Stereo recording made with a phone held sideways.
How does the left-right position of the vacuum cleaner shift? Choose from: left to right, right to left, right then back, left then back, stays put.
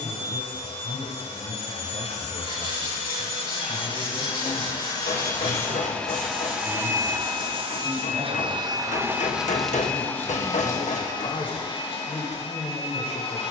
right then back.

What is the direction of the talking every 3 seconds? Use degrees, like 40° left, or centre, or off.
50° left, centre, centre, 30° left, 40° left.